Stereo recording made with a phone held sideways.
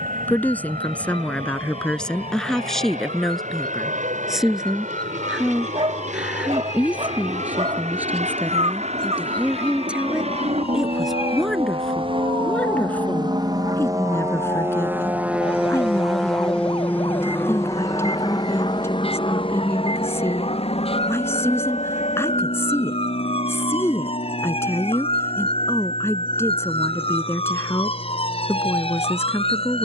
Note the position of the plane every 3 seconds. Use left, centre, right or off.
right, right, right, right, right, centre, left, left, left, left.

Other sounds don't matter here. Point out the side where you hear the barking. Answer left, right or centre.
right.